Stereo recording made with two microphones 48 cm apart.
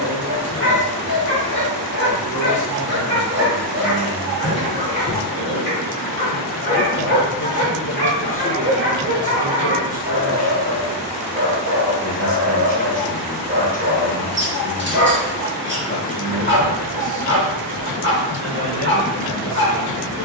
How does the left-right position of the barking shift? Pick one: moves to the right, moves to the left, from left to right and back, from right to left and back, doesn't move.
doesn't move.